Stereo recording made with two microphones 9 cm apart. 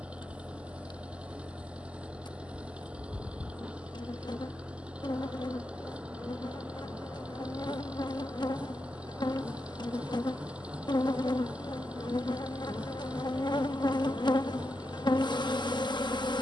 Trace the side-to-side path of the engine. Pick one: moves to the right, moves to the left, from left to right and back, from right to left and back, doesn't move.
doesn't move.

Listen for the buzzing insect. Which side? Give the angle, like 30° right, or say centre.
60° left.